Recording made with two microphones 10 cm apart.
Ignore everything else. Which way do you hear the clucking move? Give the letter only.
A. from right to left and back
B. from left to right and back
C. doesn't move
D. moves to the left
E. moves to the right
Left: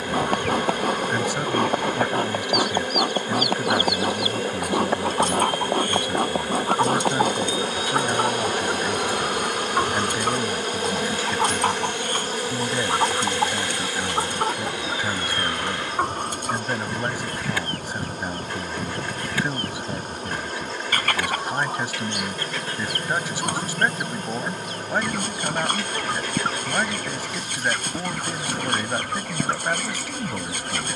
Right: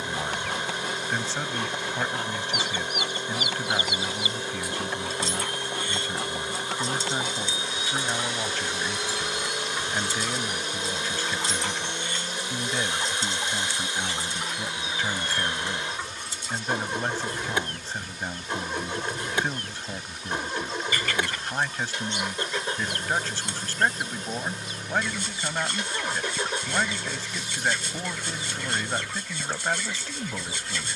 C.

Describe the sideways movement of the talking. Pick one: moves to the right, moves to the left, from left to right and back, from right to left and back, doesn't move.
doesn't move.